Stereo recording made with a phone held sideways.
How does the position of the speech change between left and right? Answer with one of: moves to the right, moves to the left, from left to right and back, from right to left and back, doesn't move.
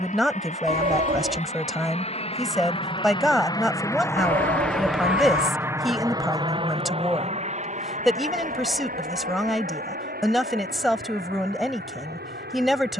doesn't move.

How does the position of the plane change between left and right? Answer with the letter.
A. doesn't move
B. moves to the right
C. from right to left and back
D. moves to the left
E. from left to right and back
B.